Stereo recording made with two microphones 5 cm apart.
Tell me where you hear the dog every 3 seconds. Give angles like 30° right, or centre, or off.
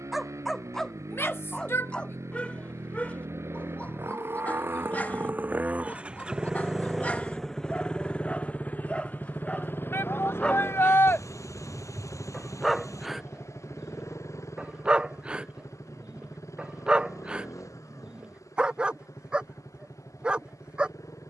20° left, 30° left, 30° left, 20° left, 10° right, 20° right, 20° right.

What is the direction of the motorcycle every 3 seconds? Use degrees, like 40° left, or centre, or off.
70° right, 40° right, 10° left, 50° left, 60° left, 70° left, 70° left.